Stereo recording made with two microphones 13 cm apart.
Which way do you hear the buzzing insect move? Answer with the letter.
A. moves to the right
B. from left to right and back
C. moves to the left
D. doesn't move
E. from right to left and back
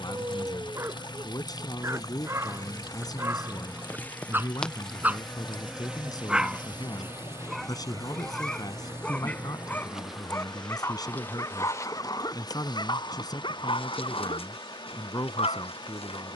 B.